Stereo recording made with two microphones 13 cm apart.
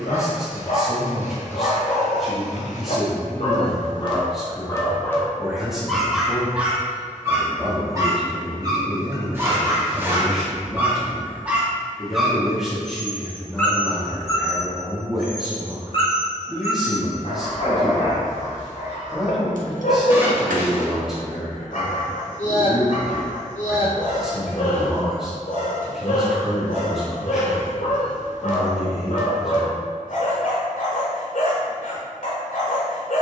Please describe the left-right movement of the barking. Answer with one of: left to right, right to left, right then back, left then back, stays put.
right then back.